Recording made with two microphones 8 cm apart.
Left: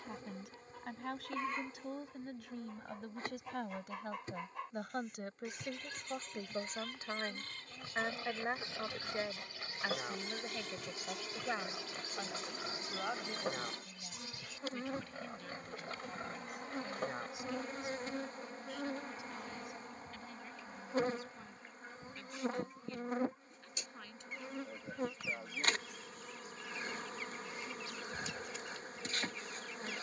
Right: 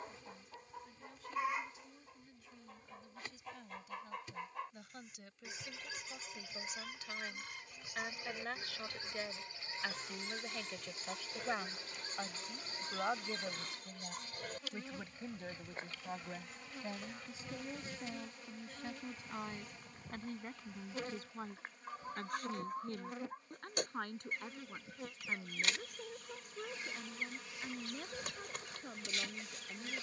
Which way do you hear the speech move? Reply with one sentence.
You can hear the speech go from the left side to the right.